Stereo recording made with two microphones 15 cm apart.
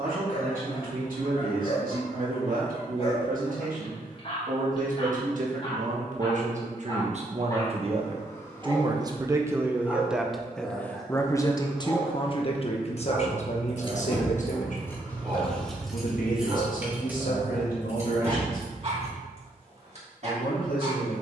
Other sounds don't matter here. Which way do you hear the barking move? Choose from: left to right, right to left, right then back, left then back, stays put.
left to right.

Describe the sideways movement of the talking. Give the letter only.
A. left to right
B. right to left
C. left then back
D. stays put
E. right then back
B.